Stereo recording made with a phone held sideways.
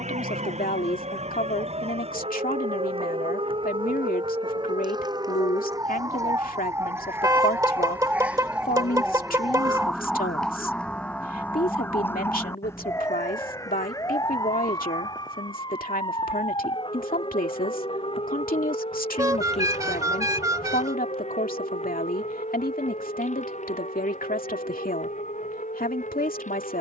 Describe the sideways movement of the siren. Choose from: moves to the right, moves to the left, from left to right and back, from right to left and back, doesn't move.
moves to the left.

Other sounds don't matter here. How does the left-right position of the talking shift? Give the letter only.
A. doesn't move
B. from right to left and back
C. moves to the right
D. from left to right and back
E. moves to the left
A.